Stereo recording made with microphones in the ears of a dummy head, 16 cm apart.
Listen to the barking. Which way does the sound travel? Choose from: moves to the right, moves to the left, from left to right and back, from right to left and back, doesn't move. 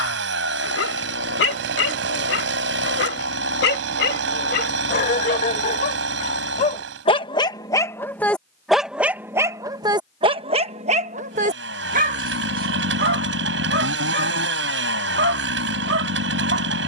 moves to the right.